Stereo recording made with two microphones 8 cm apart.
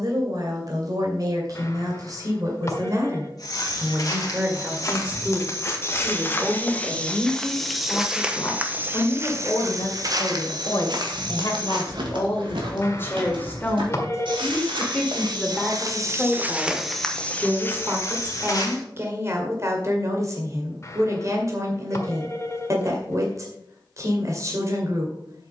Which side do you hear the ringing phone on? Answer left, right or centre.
left.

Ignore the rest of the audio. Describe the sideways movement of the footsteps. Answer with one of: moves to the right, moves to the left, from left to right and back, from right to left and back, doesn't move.
from left to right and back.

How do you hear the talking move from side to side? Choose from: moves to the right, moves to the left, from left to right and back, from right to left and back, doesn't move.
from right to left and back.